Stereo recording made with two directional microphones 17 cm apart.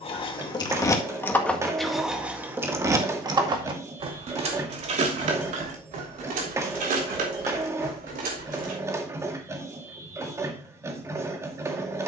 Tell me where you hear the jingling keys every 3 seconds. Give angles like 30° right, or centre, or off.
10° left, 40° right, 60° right, off.